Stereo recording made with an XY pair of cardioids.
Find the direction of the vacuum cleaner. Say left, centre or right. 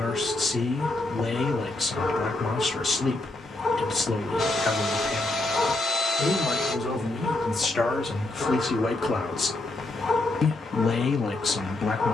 left.